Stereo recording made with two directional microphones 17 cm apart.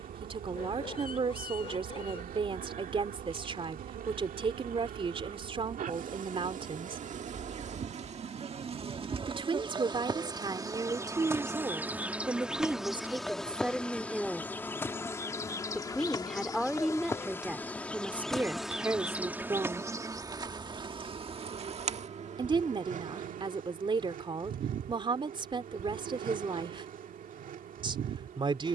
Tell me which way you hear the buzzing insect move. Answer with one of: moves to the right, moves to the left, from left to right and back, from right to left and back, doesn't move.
from right to left and back.